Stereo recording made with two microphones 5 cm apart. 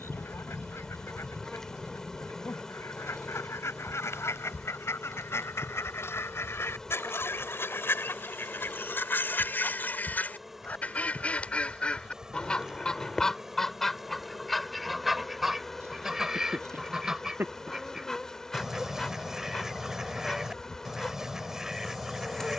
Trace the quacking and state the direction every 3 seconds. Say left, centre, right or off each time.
left, left, left, left, centre, centre, centre, centre.